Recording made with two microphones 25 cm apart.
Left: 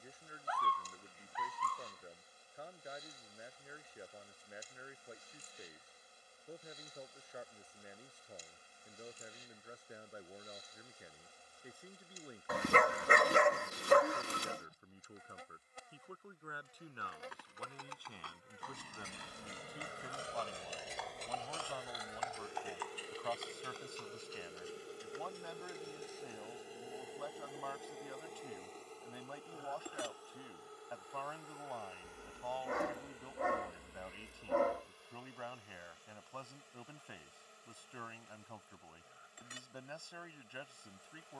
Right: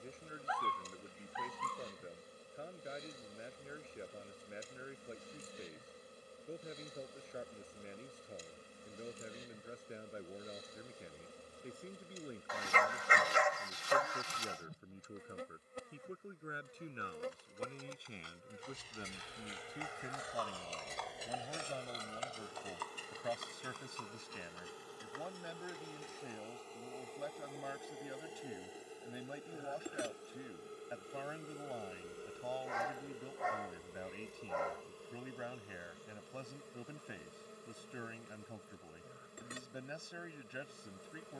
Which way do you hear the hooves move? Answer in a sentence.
You can hear the hooves go from the left side to the right.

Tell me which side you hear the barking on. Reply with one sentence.
In this clip you hear the barking on the left.